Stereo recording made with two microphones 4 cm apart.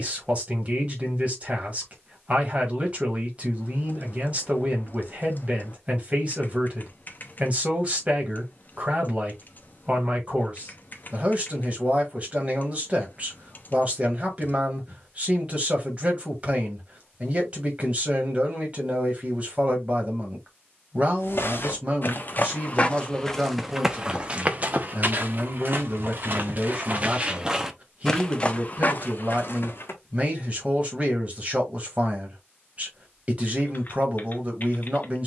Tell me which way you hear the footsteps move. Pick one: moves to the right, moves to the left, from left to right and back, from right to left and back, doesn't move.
from left to right and back.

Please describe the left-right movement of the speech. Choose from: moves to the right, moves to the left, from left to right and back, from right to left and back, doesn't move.
doesn't move.